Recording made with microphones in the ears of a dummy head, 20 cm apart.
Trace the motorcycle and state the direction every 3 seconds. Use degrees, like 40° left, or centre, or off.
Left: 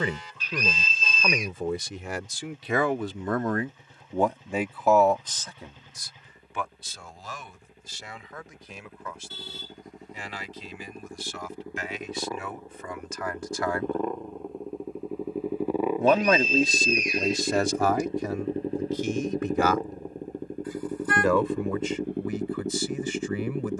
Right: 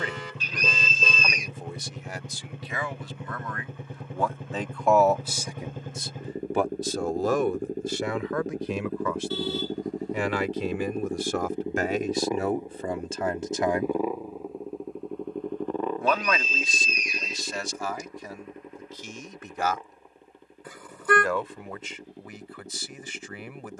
50° right, 50° right, 40° right, 30° right, 10° right, 10° left, 30° left, 50° left.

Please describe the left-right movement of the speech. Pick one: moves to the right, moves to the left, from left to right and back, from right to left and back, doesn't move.
from left to right and back.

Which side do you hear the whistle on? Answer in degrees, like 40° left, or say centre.
80° right.